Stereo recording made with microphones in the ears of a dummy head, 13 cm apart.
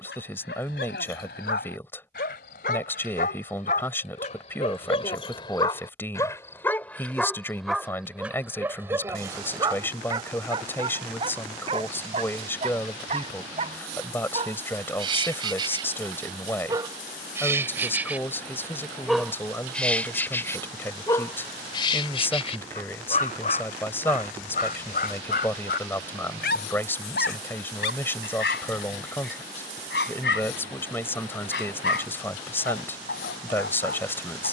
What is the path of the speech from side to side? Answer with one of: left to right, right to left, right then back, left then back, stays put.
stays put.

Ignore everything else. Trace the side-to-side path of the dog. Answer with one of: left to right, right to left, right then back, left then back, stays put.
right then back.